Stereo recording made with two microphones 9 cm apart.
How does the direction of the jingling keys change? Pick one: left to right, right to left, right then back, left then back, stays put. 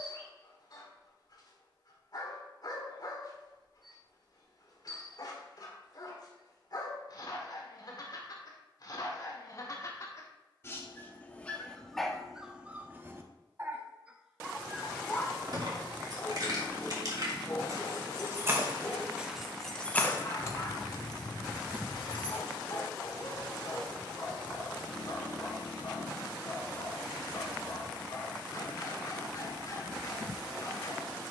right to left.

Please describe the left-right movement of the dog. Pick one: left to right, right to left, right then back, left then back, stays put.
right then back.